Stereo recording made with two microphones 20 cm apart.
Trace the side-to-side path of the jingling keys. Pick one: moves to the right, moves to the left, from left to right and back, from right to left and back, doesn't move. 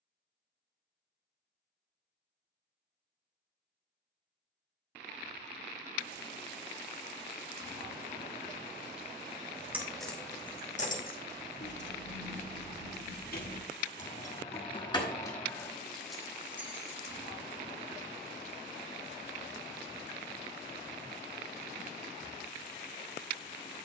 from right to left and back.